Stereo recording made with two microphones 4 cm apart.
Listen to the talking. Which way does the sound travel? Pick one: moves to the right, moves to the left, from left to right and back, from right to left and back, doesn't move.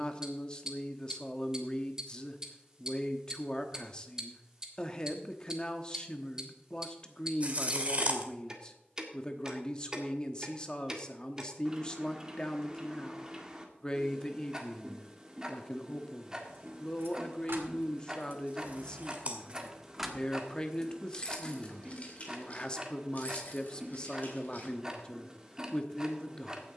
doesn't move.